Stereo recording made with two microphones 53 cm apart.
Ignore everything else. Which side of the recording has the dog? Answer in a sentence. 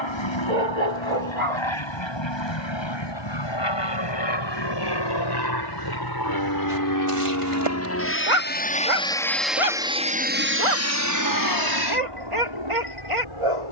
You can hear the dog on the right.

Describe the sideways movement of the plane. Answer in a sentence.
In this clip you hear the plane travel towards the right.